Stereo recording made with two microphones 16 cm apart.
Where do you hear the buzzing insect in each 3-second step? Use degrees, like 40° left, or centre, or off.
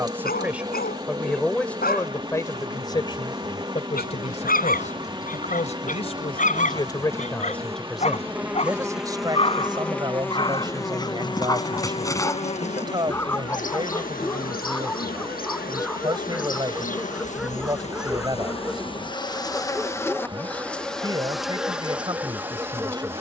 20° right, 20° right, 20° right, 20° left, 50° left, 60° left, 20° left, 10° right.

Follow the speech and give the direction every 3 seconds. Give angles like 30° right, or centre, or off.
10° left, 40° left, 10° left, 30° right, 30° right, 30° right, 30° right, 30° right.